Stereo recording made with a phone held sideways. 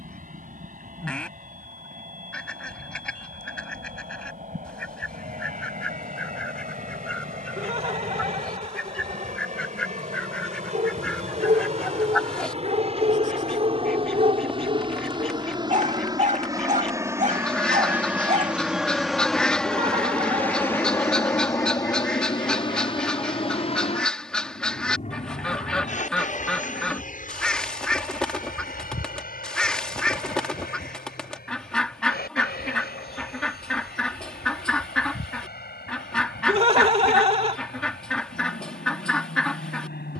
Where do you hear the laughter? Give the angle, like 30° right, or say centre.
40° right.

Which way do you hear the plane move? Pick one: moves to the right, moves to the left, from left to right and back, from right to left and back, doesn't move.
moves to the left.